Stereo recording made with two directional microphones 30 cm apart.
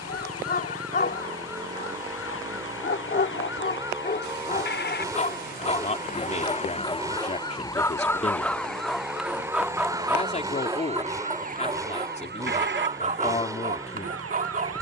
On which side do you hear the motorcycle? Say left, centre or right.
centre.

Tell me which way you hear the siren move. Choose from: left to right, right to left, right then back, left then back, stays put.
left to right.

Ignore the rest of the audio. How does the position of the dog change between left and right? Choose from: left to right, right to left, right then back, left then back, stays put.
left to right.